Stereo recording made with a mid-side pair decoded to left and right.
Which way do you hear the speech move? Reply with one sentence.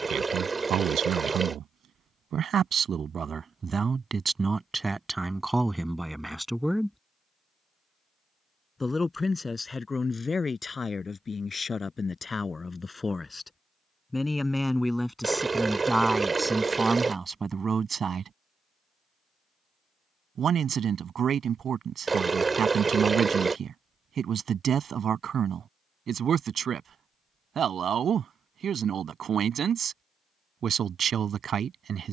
You can hear the speech go left and come back.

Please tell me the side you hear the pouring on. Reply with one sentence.
In this clip you hear the pouring on the right.